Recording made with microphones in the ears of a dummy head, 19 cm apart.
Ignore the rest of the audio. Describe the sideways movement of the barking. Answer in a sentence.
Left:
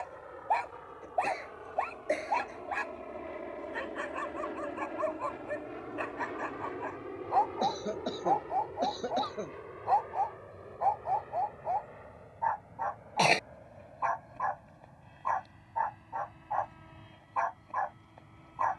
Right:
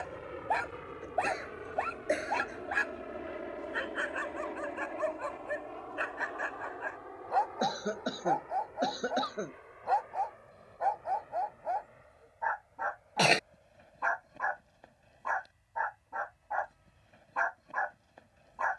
You can hear the barking stay put.